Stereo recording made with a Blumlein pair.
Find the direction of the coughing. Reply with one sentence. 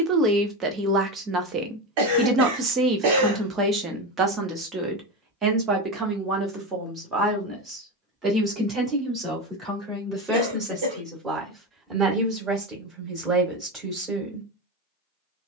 You can hear the coughing on the right.